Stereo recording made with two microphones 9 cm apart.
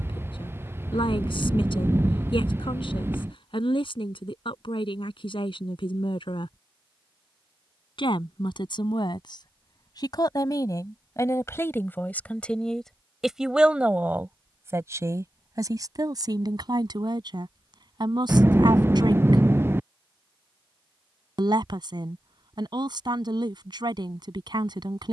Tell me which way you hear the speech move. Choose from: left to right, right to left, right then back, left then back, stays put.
left to right.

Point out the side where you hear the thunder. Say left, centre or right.
right.